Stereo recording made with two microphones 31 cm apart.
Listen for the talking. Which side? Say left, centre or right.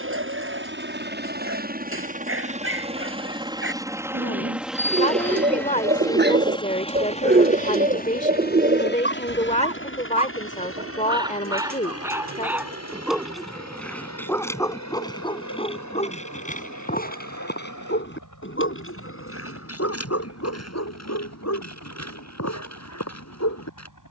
left.